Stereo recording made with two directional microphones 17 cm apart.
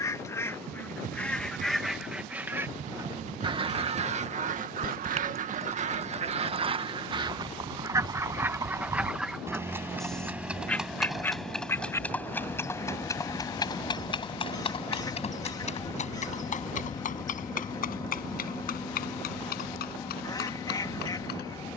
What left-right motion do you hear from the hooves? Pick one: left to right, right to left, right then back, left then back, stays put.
right to left.